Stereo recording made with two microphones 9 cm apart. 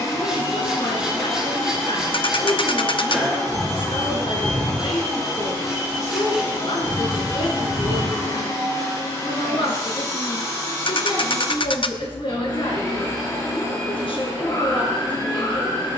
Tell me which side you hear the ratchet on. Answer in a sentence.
You can hear the ratchet on the left.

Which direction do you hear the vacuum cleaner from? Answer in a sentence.
You can hear the vacuum cleaner on the left.